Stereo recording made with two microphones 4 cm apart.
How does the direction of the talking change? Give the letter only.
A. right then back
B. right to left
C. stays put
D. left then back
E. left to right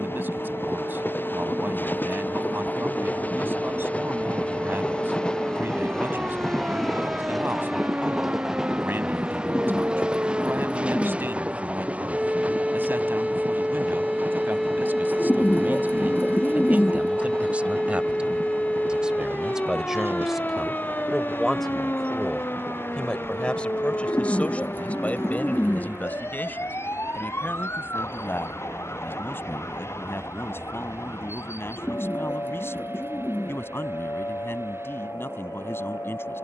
B.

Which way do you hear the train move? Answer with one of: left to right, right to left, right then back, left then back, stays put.
left to right.